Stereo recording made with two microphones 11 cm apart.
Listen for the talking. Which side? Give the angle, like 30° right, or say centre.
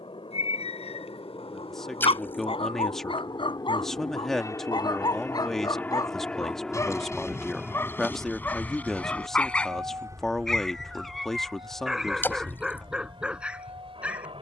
centre.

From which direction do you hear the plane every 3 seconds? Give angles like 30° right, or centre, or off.
50° left, 30° left, centre, 30° right, 40° right.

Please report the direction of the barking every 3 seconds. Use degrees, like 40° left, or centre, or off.
60° left, 40° left, 20° left, 10° left, 10° right.